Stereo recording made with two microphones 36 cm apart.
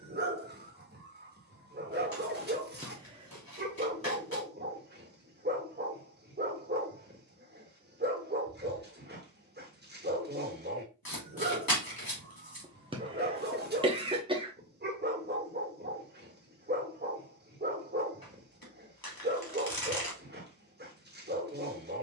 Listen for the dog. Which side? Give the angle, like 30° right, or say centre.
30° right.